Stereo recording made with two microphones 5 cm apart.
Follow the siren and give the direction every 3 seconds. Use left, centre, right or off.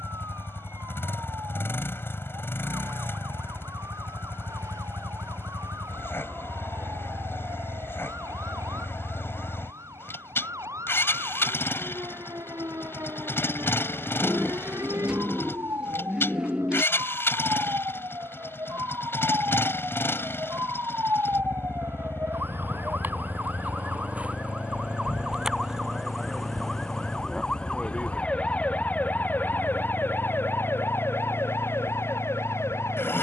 right, right, right, right, right, right, right, right, centre, left, left.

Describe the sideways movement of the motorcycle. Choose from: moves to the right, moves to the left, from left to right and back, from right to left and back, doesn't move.
doesn't move.